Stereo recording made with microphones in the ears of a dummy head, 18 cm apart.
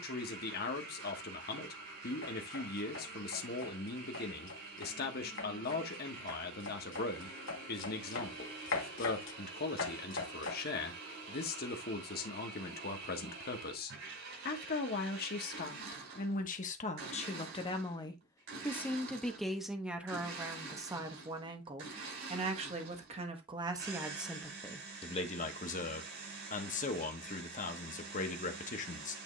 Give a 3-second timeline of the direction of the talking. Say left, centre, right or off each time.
left, left, left, left, left, left, centre, right, left, left.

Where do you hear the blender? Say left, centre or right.
right.